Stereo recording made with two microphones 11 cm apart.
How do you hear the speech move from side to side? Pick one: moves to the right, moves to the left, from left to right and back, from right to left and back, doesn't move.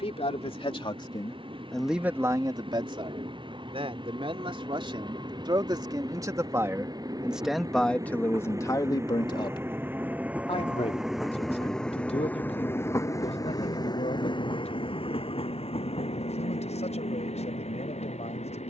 from left to right and back.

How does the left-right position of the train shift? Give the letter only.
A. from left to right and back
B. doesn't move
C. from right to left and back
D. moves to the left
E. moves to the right
D.